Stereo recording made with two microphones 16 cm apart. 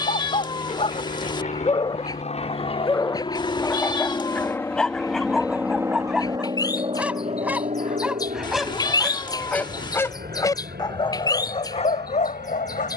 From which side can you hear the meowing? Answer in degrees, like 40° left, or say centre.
30° left.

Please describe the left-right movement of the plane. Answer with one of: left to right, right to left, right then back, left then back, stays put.
left to right.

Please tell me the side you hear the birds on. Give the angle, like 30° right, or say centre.
20° left.